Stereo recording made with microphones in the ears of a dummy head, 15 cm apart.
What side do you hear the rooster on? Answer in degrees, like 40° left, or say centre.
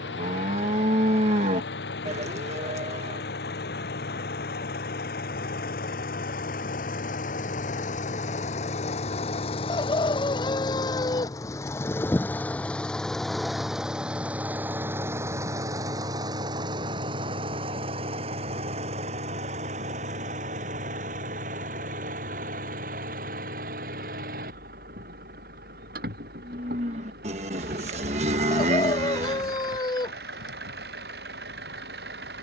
20° left.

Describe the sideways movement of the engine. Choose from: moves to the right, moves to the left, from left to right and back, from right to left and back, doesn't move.
moves to the right.